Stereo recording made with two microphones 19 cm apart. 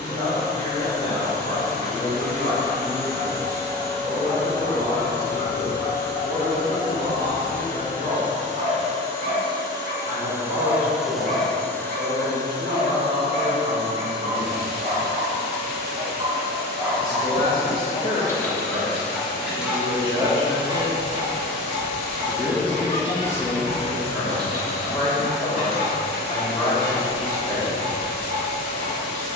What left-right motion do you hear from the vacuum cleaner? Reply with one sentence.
You can hear the vacuum cleaner move from right to left.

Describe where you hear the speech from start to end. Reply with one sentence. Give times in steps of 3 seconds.
In this clip you hear the speech on the right from 0 s, in the centre from 21 s and on the left from 24 s.